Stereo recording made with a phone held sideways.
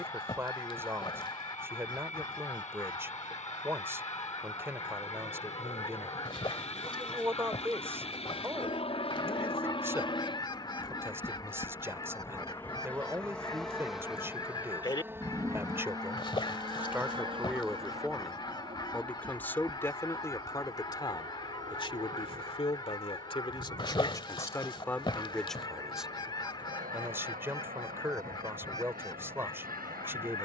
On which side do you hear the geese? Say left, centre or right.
left.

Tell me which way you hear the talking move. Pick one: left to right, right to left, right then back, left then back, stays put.
left then back.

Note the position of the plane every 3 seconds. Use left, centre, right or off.
left, left, left, left, centre, right, right, right, right, right.